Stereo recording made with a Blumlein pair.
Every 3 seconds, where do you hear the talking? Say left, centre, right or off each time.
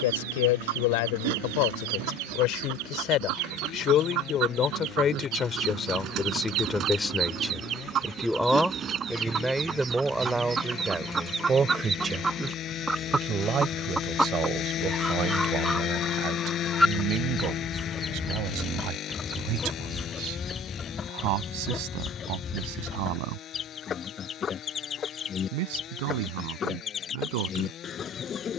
left, left, centre, centre, right, right, right, right, right, right.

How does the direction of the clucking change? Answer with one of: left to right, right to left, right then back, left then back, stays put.
right to left.